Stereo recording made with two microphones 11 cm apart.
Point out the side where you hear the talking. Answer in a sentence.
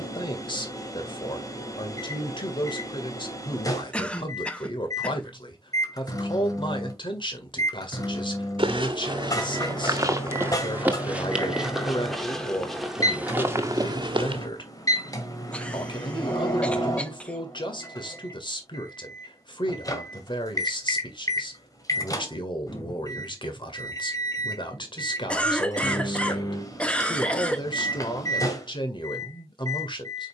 You can hear the talking on the left.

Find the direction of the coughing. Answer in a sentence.
You can hear the coughing in the centre.